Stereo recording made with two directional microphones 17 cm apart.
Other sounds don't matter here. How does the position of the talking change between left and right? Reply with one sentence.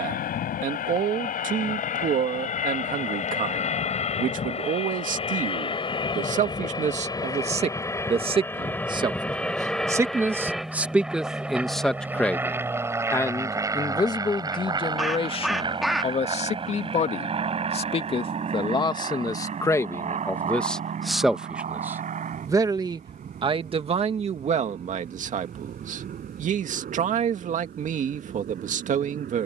You can hear the talking move from right to left and back again.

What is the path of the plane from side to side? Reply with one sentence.
In this clip you hear the plane move to the right.